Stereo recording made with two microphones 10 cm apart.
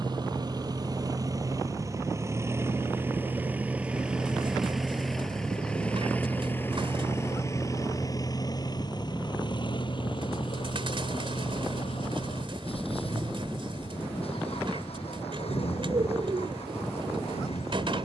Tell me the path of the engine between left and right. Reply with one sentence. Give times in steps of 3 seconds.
In this clip you hear the engine on the right from 0 s, in the centre from 3 s and on the left from 6 s.